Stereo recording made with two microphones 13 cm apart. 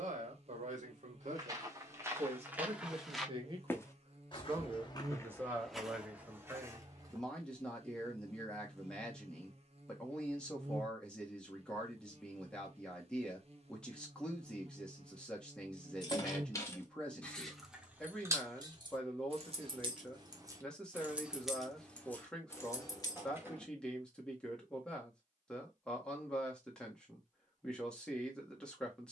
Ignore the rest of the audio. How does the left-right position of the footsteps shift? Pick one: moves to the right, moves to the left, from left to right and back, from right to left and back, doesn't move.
from right to left and back.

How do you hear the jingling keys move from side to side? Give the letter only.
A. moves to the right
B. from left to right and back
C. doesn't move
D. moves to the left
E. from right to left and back
B.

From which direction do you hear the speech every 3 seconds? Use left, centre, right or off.
right, right, centre, centre, centre, centre, centre, centre, centre, centre.